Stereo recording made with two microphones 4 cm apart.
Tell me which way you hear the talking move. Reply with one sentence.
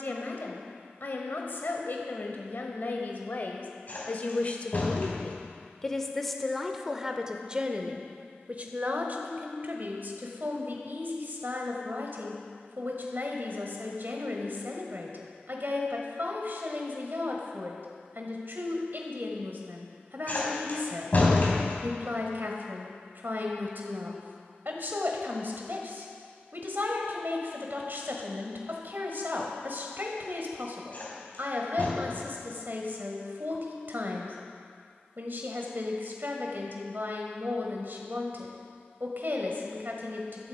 In this clip you hear the talking move to the right.